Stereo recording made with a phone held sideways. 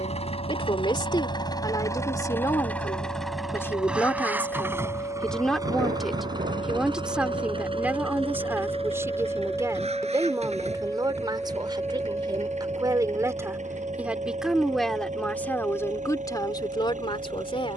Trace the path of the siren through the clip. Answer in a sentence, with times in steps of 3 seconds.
You can hear the siren on the left from 0 s, in the centre from 9 s and on the right from 12 s.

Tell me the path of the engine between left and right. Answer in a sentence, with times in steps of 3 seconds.
In this clip you hear the engine on the left from 0 s, in the centre from 3 s and on the right from 6 s.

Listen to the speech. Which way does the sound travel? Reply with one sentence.
You can hear the speech move from left to right and back again.